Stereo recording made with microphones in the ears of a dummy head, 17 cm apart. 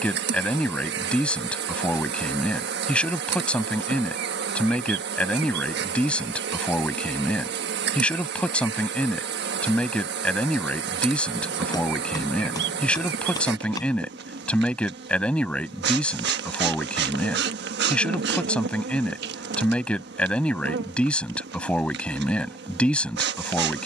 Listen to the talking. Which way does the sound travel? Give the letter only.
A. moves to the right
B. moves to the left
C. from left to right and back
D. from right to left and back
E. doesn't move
E.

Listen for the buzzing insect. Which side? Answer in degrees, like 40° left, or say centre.
60° right.